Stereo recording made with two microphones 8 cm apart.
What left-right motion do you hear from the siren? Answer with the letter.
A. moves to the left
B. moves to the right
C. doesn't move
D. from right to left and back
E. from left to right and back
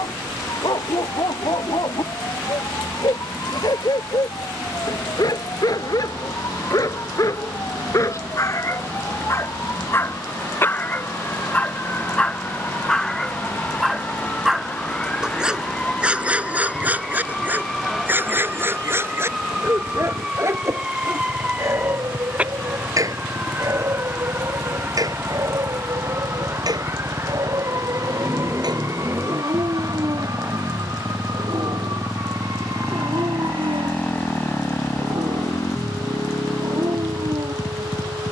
B.